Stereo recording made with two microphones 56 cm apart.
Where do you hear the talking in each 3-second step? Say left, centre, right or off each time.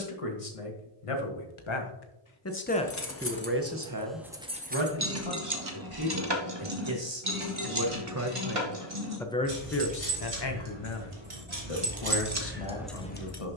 left, right, right, left, left.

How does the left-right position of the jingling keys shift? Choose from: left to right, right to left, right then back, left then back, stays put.
right then back.